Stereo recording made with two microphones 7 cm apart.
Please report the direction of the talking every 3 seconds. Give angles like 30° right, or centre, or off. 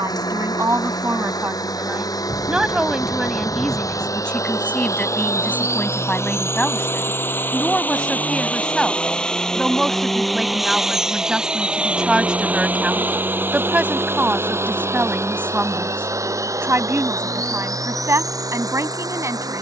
30° right, 10° left, 10° left, centre, 20° right, 30° right, 40° right.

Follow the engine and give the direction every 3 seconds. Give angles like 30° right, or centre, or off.
60° left, 50° left, 30° left, centre, 30° right, 50° right, 50° right.